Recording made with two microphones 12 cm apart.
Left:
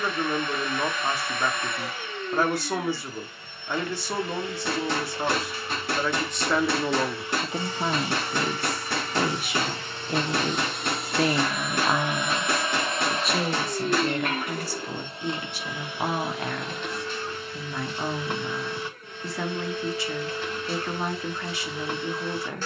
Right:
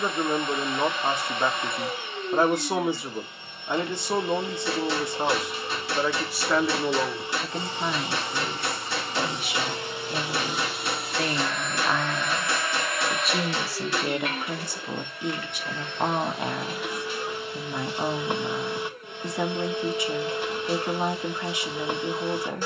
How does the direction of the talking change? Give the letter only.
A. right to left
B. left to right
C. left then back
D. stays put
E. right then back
C.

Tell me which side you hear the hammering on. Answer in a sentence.
You can hear the hammering on the left.